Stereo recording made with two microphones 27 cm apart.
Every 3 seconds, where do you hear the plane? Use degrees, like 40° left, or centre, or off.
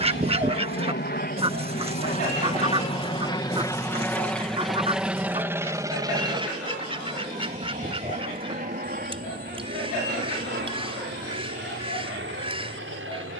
40° left, centre, 20° right, 40° right, 50° right.